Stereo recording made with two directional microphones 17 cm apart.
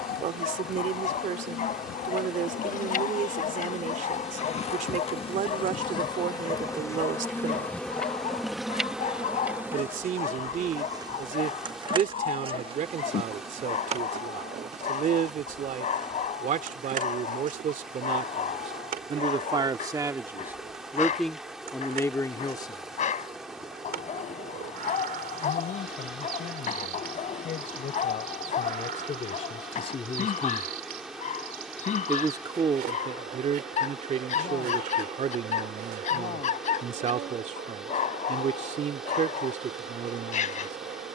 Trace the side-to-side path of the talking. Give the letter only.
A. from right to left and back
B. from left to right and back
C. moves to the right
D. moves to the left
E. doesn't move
A.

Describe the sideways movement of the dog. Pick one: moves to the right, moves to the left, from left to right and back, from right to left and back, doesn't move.
doesn't move.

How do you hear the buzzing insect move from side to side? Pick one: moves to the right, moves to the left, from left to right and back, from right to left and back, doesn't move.
moves to the right.